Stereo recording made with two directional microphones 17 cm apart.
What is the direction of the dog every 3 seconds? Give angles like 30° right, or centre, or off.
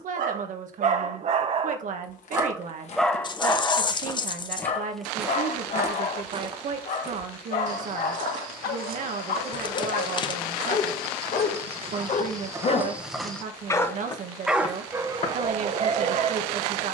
40° right, 30° left, 60° left, 60° left, 20° left, 40° right.